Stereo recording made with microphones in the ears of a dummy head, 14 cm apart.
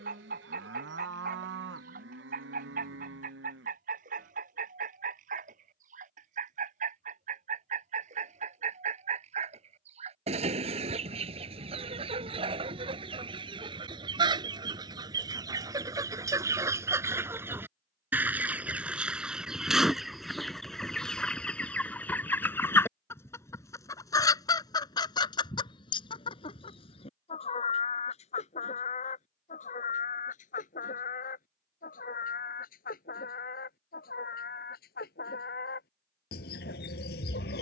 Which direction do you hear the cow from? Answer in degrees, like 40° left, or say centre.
70° right.